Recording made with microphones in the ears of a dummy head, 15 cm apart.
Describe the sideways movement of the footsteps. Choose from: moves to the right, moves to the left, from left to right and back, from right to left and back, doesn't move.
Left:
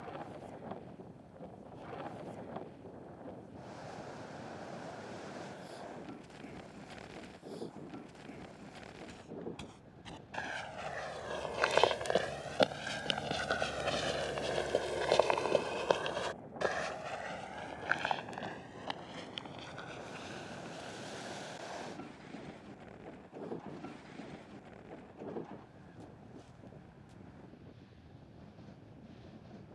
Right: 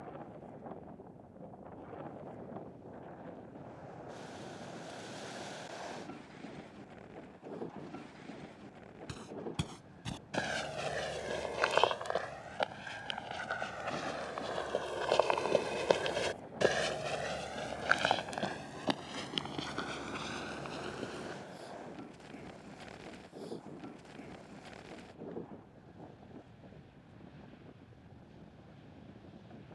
from right to left and back.